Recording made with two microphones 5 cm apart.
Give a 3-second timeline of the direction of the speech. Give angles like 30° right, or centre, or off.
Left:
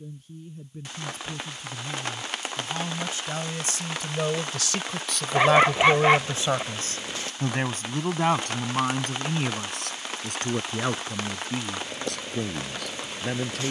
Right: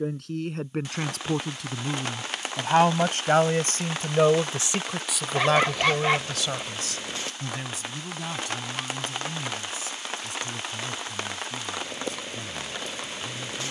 70° right, 20° right, 40° left, 60° left, 70° left.